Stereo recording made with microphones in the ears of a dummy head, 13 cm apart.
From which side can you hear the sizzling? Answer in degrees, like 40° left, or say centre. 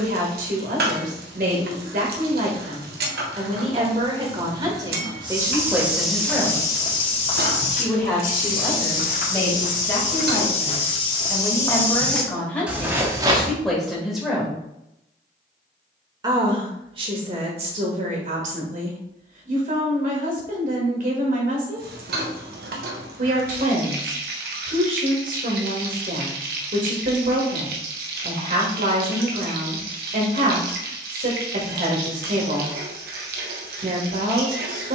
70° right.